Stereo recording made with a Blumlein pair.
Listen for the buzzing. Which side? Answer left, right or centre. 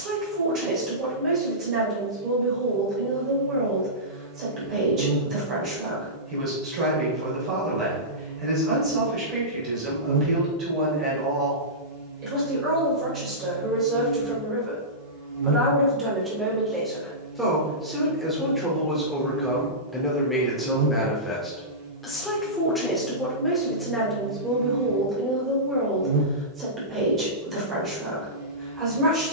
right.